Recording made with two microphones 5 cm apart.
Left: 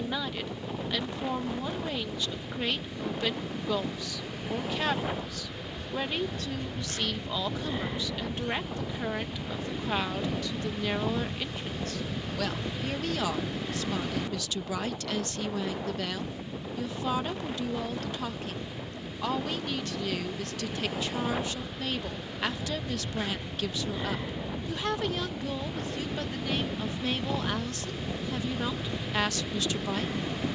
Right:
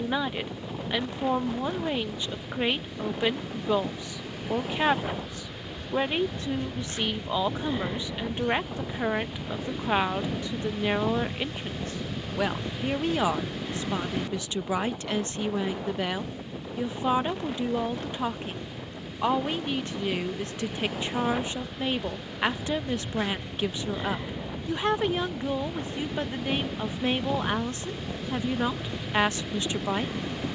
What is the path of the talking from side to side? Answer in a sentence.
In this clip you hear the talking stay in one place.